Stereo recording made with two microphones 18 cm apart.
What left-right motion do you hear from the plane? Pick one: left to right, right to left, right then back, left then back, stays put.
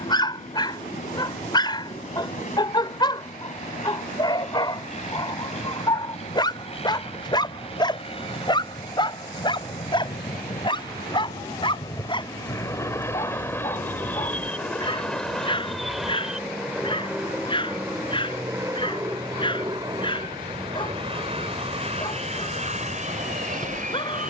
left to right.